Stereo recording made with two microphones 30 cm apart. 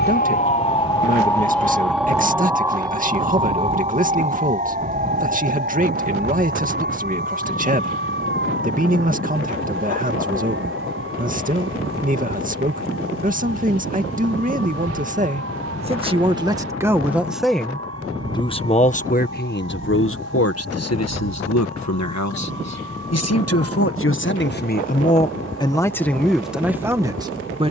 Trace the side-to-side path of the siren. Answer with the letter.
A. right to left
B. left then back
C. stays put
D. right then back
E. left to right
E.